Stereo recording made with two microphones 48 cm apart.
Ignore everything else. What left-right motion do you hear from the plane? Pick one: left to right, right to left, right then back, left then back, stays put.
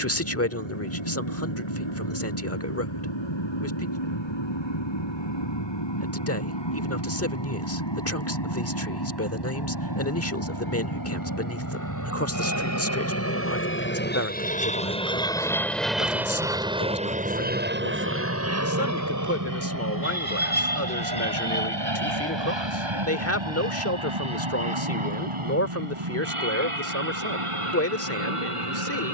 left to right.